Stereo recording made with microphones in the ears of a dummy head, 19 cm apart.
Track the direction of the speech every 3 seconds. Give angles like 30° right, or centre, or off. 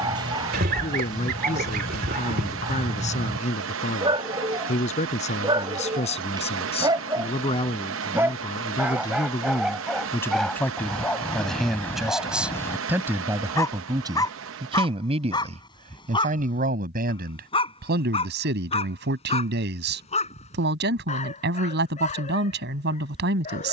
30° left, 30° left, 30° left, 10° left, 10° right, 40° right, 50° right, 50° right.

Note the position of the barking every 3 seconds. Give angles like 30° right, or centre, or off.
20° right, 20° right, 20° right, centre, 10° left, 20° left, 30° left, 40° left.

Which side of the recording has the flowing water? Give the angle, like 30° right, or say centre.
70° right.